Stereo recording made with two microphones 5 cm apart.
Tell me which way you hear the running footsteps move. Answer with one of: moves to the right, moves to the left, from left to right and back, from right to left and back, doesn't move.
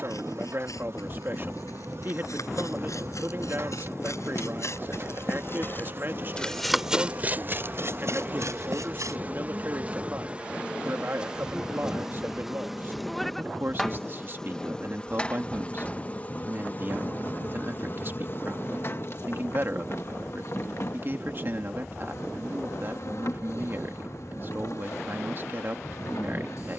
moves to the right.